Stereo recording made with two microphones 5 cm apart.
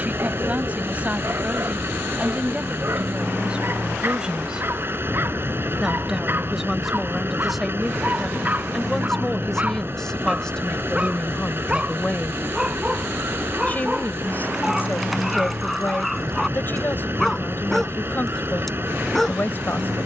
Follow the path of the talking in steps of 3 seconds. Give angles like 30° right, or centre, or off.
30° right, 20° right, centre, 10° left, 30° left, 40° left, 40° left.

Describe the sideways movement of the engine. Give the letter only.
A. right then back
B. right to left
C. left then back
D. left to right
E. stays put
E.